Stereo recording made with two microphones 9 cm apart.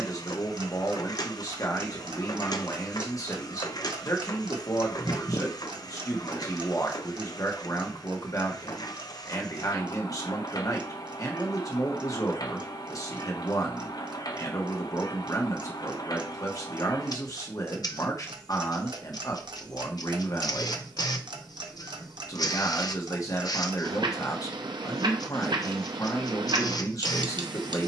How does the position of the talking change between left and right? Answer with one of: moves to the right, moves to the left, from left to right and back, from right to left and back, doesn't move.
doesn't move.